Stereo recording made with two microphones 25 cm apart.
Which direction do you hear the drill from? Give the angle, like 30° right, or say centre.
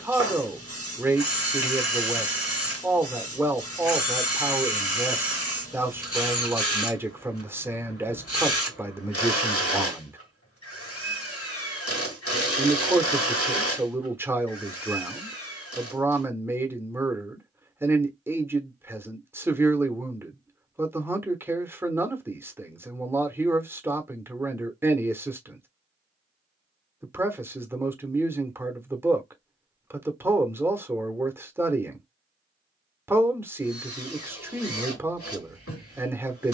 60° left.